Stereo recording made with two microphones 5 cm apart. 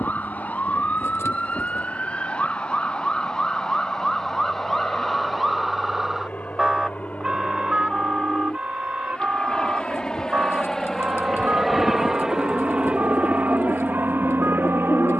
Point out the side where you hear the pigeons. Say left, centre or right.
left.